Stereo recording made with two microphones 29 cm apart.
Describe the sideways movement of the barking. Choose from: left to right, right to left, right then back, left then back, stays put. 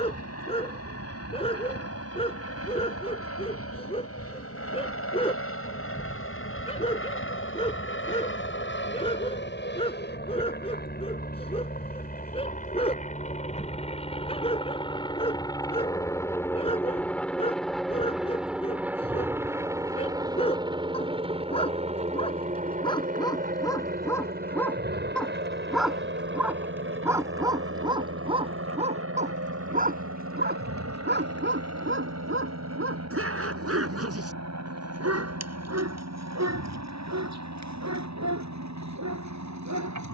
left to right.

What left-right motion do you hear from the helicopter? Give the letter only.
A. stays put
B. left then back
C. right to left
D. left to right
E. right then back
D.